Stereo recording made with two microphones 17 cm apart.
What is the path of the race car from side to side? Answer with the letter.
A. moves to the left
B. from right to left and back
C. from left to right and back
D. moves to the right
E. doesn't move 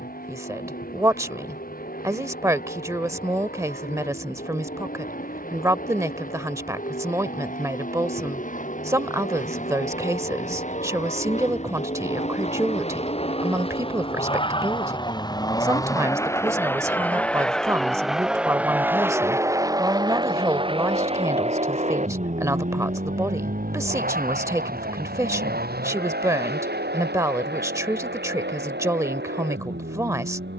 D.